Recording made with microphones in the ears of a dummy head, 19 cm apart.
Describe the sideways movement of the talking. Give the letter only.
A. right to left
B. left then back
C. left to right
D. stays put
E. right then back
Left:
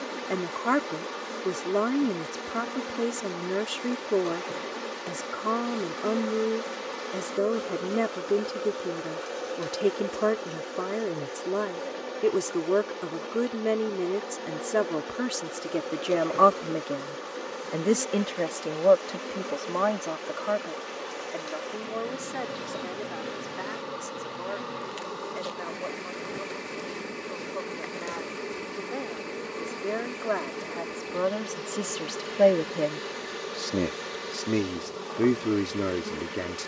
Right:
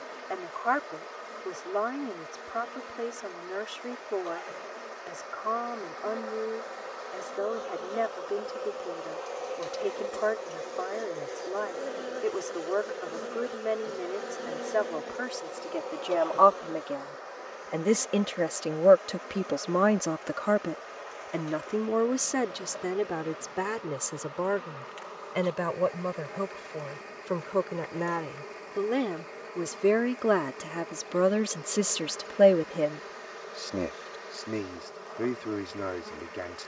E.